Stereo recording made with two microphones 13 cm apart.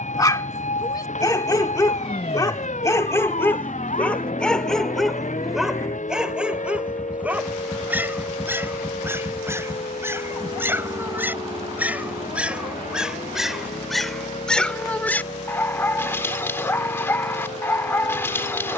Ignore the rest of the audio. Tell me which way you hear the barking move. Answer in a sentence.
You can hear the barking move from left to right and back again.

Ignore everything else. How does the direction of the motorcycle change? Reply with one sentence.
You can hear the motorcycle move from left to right.